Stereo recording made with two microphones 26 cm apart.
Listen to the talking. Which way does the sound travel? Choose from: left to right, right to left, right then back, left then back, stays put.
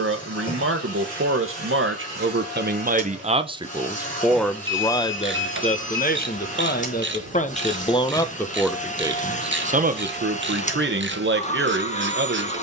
left then back.